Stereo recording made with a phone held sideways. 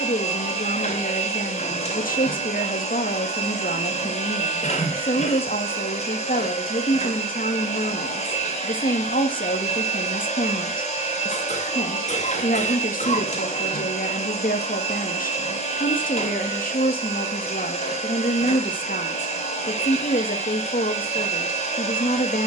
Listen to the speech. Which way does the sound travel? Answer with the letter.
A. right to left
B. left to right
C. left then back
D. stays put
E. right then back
D.